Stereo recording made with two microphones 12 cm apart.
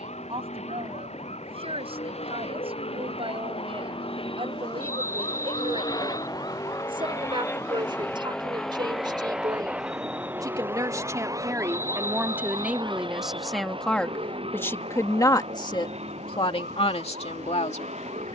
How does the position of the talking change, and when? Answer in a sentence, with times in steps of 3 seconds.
You can hear the talking on the right from 0 s, in the centre from 12 s and on the left from 15 s.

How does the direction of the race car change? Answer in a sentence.
In this clip you hear the race car move to the right.